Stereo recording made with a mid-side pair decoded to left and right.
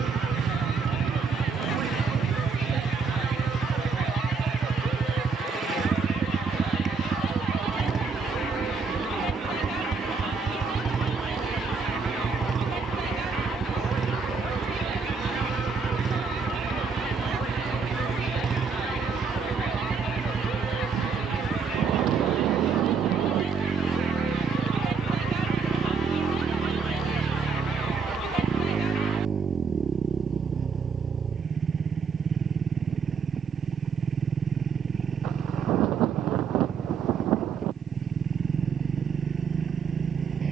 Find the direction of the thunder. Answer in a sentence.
In this clip you hear the thunder on the right.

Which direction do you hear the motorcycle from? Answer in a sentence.
In this clip you hear the motorcycle on the right.